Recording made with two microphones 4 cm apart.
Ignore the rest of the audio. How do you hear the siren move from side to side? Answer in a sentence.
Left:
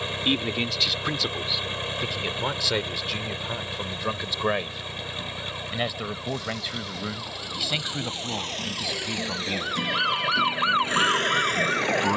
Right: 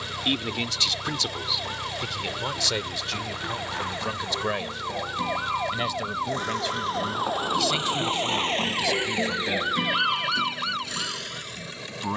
In this clip you hear the siren move from right to left.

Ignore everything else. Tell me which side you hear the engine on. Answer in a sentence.
In this clip you hear the engine on the left.